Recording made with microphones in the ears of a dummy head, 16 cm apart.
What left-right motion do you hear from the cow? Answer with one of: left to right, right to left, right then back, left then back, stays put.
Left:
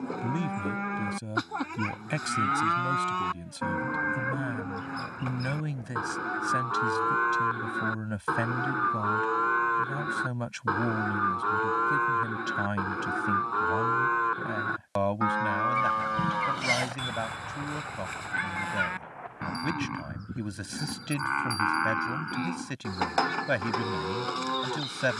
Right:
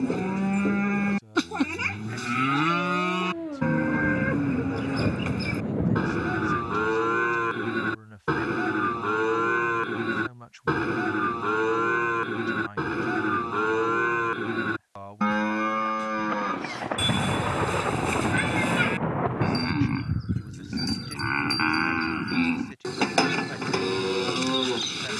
stays put.